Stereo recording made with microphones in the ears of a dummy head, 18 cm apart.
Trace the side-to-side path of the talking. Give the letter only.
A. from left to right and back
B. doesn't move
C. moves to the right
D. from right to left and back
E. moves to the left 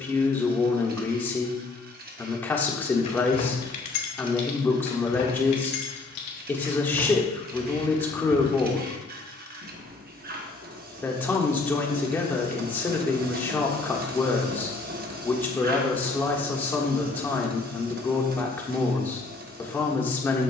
B.